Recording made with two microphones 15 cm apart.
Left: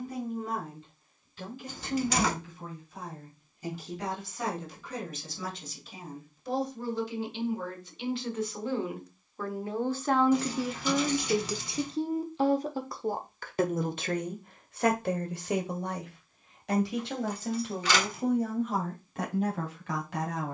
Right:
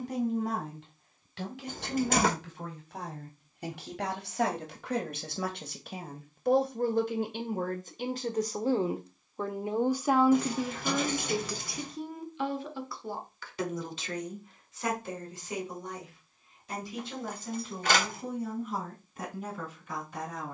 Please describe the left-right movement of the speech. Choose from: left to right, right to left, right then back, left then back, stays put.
right to left.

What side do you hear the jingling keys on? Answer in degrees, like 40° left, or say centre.
50° right.